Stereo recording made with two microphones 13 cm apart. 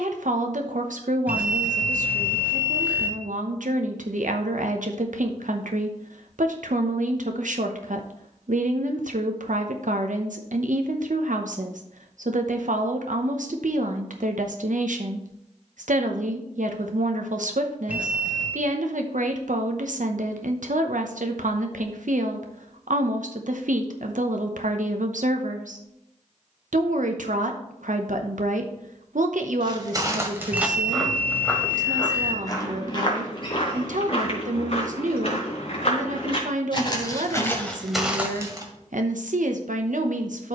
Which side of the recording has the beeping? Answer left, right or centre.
centre.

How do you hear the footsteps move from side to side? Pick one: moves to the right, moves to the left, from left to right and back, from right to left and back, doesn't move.
from right to left and back.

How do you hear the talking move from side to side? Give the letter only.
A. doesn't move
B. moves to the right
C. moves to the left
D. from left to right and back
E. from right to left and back
A.